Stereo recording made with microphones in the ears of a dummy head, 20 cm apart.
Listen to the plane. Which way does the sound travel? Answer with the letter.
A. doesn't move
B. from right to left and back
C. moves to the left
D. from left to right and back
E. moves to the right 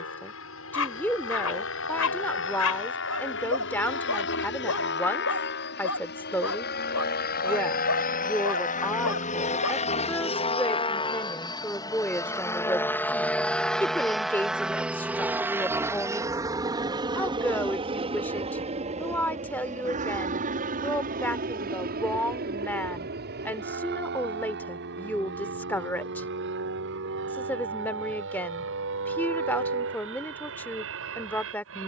E.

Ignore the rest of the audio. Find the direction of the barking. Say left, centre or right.
left.